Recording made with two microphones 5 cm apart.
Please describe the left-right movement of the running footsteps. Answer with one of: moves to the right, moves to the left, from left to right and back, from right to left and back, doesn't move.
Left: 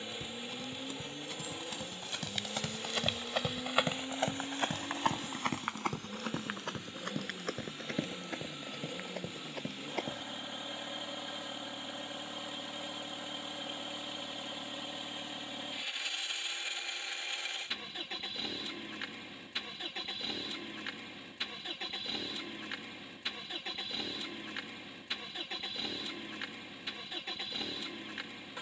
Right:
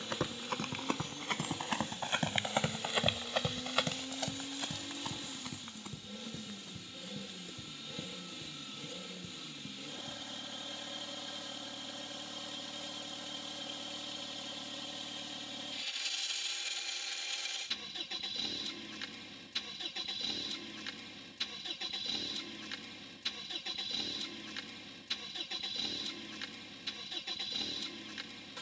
moves to the left.